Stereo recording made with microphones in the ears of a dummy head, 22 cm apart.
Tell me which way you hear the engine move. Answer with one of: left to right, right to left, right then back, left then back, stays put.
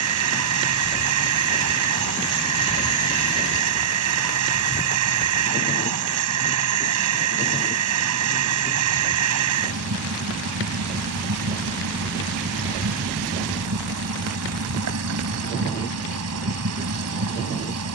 stays put.